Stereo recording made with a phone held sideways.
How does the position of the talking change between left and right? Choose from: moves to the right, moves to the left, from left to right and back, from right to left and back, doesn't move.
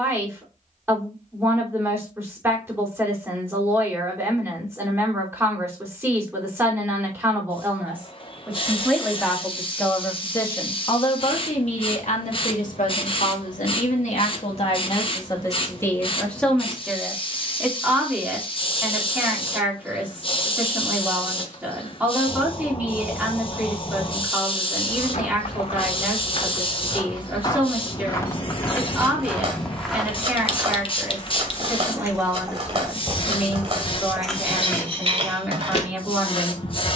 from right to left and back.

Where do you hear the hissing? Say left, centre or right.
left.